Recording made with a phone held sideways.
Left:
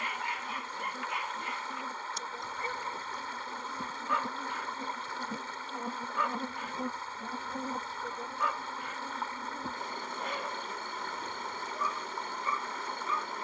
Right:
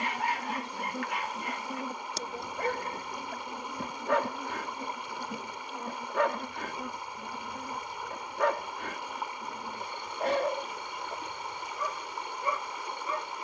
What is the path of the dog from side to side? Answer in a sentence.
You can hear the dog stay in one place.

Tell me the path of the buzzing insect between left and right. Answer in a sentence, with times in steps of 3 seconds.
You can hear the buzzing insect on the right from 0 s, in the centre from 3 s and on the left from 6 s.